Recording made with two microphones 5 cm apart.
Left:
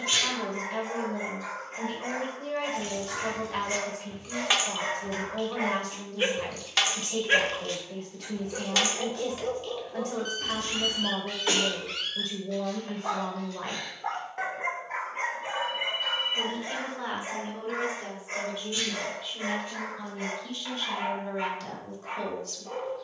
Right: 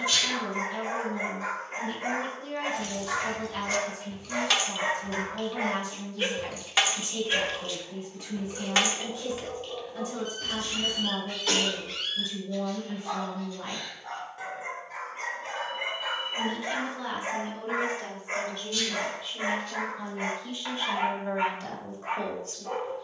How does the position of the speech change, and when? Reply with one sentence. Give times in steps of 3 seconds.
You can hear the speech on the left from 0 s, in the centre from 18 s and on the right from 21 s.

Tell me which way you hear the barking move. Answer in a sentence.
In this clip you hear the barking move from right to left and back again.